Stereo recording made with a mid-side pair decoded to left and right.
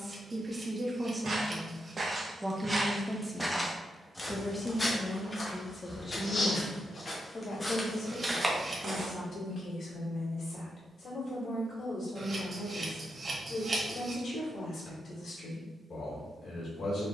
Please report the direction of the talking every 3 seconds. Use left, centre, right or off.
right, left, left, left, left, left.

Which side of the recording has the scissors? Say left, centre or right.
right.